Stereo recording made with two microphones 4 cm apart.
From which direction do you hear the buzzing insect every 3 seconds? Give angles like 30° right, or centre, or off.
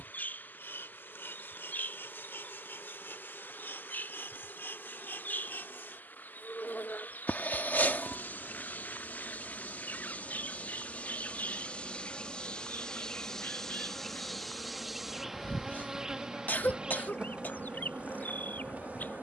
60° left, 60° left, 50° left, 40° left, 10° left, 20° right, 40° right.